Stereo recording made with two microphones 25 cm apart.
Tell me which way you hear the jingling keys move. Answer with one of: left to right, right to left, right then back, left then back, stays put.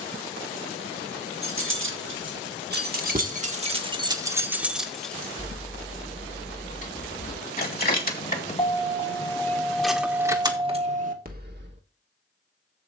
left then back.